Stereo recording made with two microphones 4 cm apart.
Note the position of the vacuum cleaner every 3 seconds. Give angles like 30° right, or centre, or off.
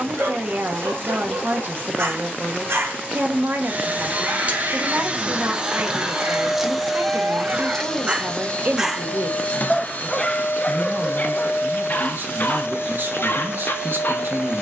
50° right, 30° right, 10° left, 50° left, 70° left.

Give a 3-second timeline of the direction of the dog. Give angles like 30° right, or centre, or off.
70° right, 60° right, 40° right, 30° left, 60° left.